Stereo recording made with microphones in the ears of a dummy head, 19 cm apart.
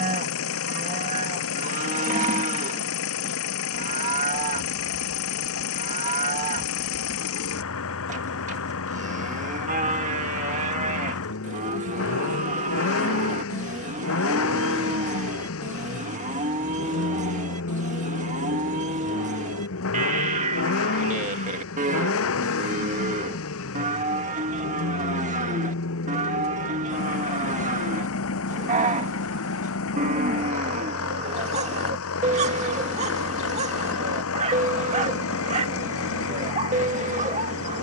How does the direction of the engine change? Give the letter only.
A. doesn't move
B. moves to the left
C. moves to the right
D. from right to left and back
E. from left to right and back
A.